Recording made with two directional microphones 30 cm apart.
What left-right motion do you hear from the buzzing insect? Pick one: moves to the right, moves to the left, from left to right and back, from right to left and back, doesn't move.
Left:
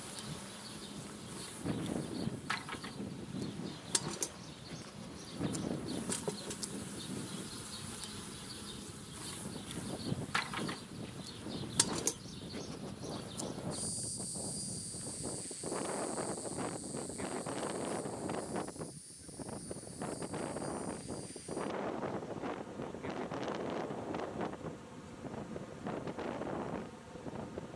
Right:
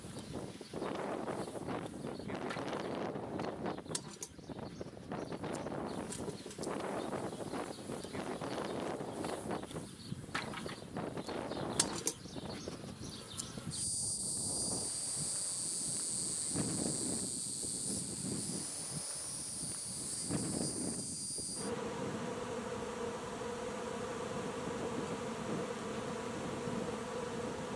moves to the right.